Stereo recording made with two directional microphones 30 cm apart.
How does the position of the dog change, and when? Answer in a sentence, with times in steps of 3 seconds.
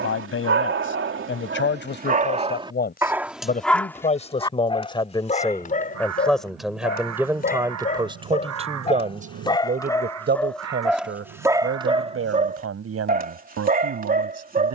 You can hear the dog on the right from 0 s, in the centre from 3 s, on the left from 6 s, in the centre from 9 s and on the right from 12 s.